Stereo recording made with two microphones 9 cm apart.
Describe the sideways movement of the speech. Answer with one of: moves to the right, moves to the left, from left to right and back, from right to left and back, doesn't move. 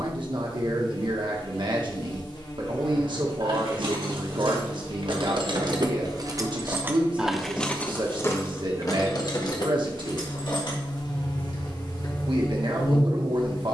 doesn't move.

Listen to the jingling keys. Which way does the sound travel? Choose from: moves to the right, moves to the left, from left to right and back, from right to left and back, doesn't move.
moves to the left.